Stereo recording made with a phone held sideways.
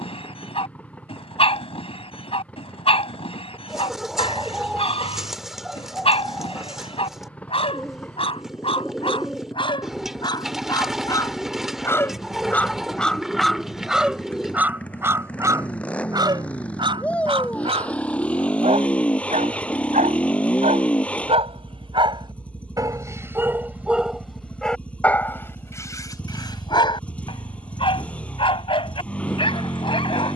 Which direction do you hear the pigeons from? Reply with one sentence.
In this clip you hear the pigeons in the centre.